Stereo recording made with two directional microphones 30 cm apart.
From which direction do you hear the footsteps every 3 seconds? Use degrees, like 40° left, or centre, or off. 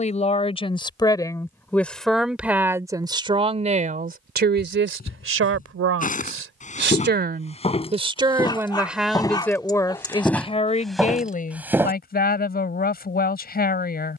off, 30° left, 20° left, centre, off.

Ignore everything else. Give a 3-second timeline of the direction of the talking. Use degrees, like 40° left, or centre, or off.
10° left, 30° right, 30° right, 20° left, 30° left.